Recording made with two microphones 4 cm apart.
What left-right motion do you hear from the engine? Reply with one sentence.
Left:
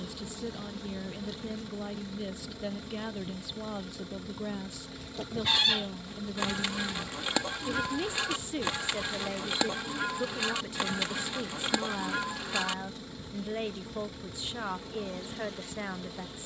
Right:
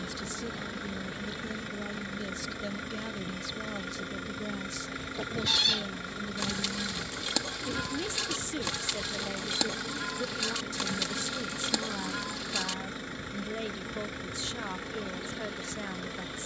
You can hear the engine stay put.